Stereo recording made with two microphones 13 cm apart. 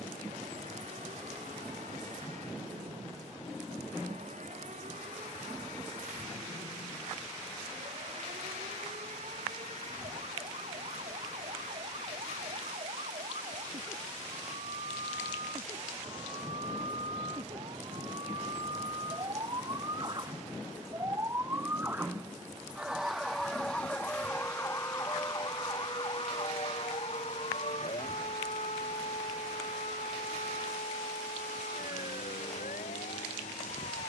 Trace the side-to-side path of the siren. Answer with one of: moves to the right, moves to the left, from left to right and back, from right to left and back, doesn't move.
moves to the left.